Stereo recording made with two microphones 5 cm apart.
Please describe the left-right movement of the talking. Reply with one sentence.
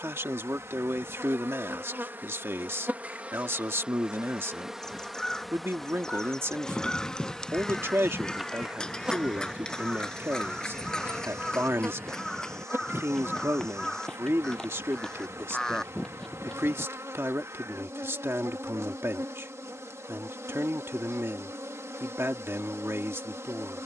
You can hear the talking stay in one place.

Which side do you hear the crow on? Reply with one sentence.
In this clip you hear the crow in the centre.